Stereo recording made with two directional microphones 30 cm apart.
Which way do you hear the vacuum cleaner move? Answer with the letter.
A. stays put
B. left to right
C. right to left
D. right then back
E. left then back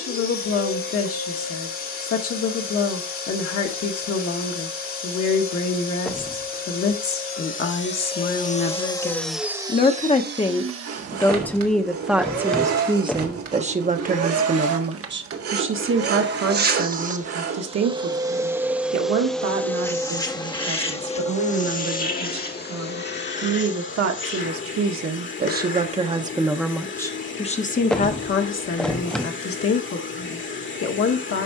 D.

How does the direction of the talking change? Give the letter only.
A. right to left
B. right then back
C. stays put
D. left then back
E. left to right
B.